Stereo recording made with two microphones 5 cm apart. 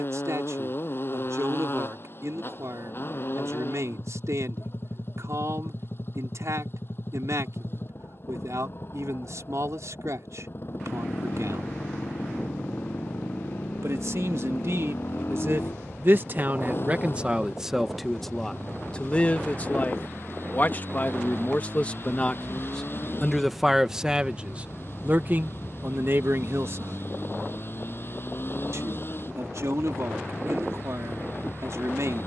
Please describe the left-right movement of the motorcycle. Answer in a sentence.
You can hear the motorcycle stay in one place.